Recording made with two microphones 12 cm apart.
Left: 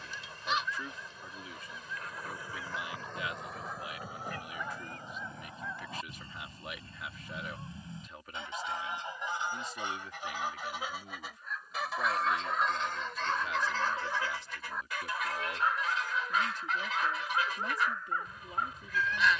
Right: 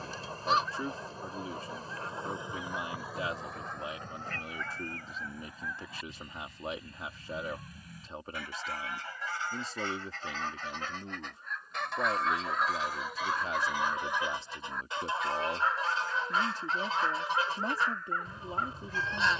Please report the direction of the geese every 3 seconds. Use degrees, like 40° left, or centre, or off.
30° right, 10° left, 30° left, 10° left, 10° right, 30° right, 30° right.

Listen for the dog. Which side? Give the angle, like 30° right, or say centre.
centre.